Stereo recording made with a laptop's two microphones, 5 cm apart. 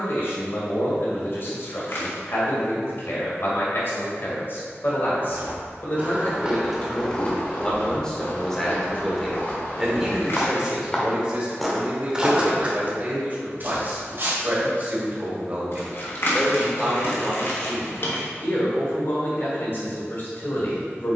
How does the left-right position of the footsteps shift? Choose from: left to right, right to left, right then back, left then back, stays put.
left then back.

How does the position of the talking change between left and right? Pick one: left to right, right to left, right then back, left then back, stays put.
right then back.